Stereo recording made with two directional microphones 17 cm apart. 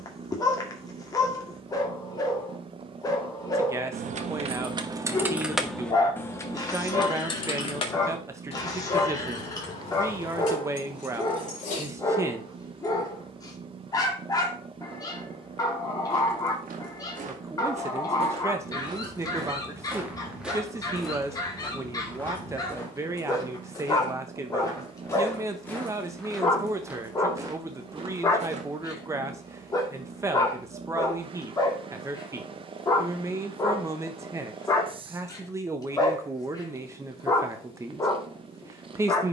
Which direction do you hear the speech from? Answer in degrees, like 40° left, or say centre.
20° right.